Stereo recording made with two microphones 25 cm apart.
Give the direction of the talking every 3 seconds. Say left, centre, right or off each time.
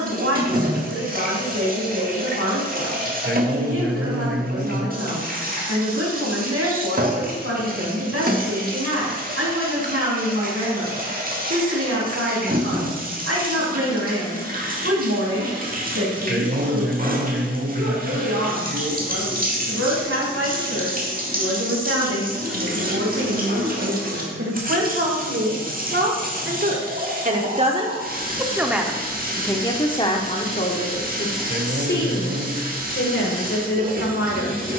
right, right, right, right, right, right, right, right, right, centre, left, left.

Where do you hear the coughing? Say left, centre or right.
right.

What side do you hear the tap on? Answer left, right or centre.
right.